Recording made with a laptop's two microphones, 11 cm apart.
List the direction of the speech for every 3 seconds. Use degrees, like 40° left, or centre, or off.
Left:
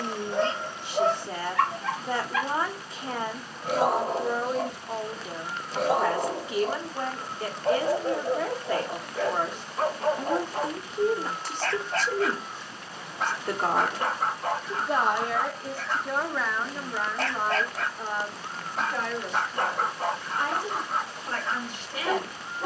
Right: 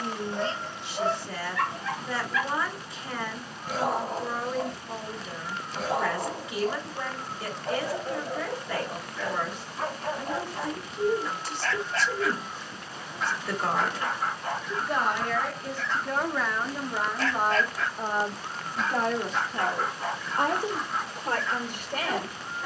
40° left, 40° left, 40° left, 40° left, 40° left, centre, 40° right, 60° right.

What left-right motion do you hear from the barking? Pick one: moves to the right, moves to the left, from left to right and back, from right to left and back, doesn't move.
doesn't move.